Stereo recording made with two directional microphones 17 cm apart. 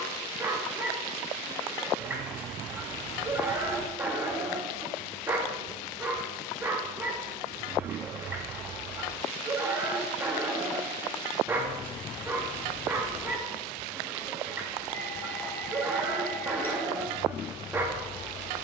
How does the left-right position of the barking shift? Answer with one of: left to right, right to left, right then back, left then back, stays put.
stays put.